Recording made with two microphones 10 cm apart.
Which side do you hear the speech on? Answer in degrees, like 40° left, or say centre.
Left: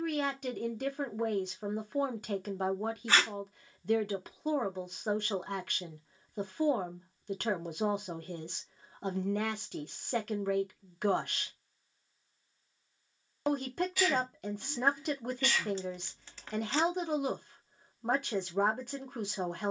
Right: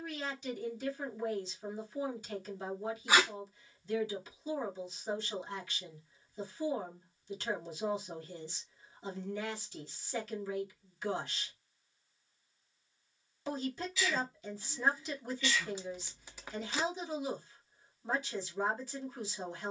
60° left.